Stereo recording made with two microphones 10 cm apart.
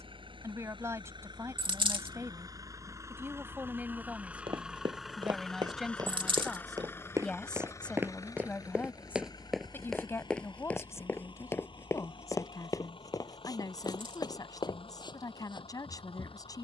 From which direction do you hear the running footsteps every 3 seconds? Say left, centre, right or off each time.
off, right, right, centre, left, left.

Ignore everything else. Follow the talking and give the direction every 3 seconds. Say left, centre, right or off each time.
right, centre, centre, left, left, left.